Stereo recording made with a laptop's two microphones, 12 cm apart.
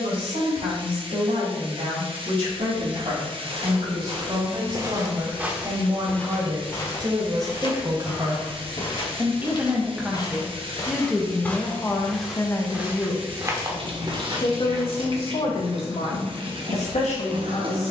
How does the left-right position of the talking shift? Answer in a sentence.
You can hear the talking travel towards the left.